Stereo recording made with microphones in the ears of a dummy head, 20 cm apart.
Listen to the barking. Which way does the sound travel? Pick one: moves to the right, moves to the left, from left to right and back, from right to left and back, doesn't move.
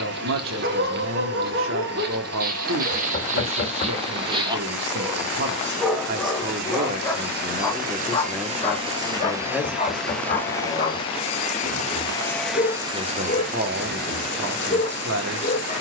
moves to the left.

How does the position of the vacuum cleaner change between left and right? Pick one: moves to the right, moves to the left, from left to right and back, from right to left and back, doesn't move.
from right to left and back.